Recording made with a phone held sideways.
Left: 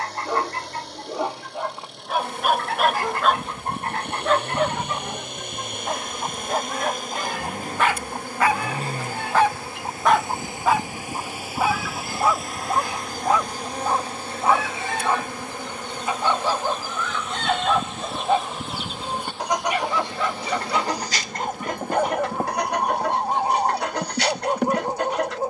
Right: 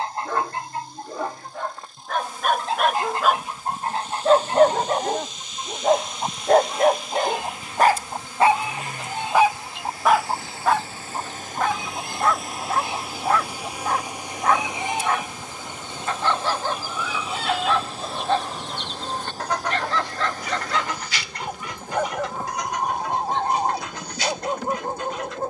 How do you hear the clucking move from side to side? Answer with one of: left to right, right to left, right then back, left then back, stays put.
right to left.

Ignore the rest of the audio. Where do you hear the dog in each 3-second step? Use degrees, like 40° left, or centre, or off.
10° left, 40° right, 50° right, centre, 10° left, 10° left, 10° left, 10° left, 10° left.